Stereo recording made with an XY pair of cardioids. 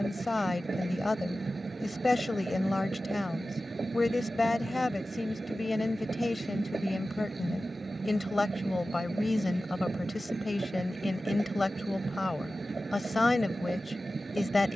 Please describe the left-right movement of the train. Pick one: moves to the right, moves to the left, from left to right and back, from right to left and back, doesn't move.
doesn't move.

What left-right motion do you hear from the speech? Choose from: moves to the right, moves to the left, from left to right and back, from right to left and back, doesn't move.
doesn't move.